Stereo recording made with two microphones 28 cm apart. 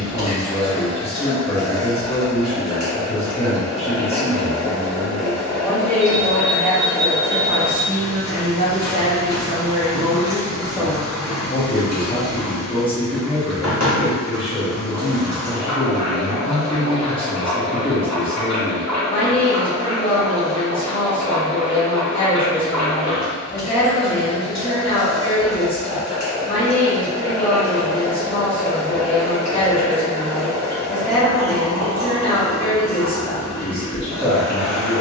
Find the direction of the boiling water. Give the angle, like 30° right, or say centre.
60° left.